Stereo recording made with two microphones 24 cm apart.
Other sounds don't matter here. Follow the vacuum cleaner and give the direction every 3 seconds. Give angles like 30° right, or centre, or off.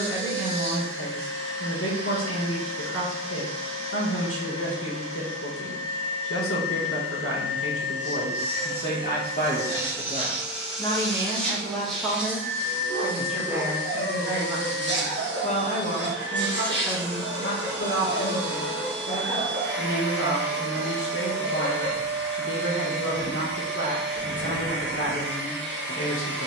60° right, 60° right, 40° right, 10° right, 30° right, 50° right, 50° right, 50° right, 50° right.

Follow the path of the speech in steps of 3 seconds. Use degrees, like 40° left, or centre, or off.
60° left, 60° left, 60° left, 20° left, centre, 50° left, 60° left, 60° left, 60° left.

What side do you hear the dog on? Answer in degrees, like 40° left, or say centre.
60° right.